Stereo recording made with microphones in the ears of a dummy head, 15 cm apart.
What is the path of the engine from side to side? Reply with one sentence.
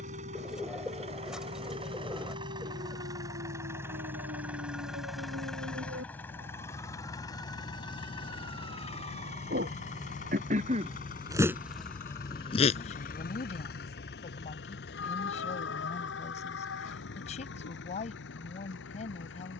You can hear the engine move to the left.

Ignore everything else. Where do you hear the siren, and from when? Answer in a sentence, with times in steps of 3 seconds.
In this clip you hear the siren on the right from 0 s and on the left from 12 s.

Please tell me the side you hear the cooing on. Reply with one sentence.
In this clip you hear the cooing in the centre.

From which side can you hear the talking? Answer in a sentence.
In this clip you hear the talking on the left.